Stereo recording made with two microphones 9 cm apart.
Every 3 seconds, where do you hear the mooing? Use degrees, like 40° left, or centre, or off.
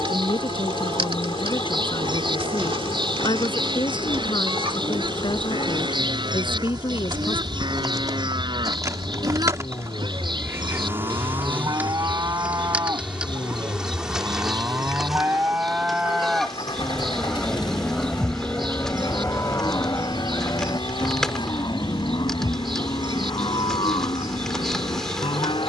60° right, 60° right, 60° right, 50° right, 30° right, 10° right, 30° left, 60° left, 70° left.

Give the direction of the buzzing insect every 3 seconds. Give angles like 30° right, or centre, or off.
80° right, 60° right, 50° right, 30° right, 10° right, centre, 10° left, 10° left, 10° left.